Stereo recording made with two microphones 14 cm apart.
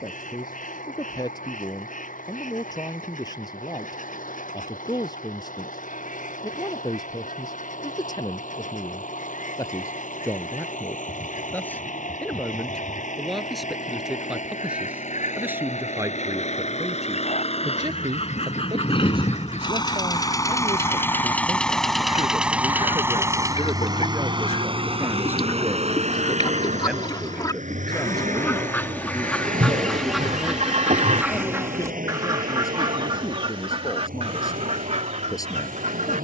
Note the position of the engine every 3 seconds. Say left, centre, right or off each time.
left, left, left, left, left, left, left, centre, right, right, right, right.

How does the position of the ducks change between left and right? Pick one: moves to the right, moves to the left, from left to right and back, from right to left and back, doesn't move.
moves to the right.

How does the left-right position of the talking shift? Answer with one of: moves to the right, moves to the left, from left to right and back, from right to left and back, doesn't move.
from left to right and back.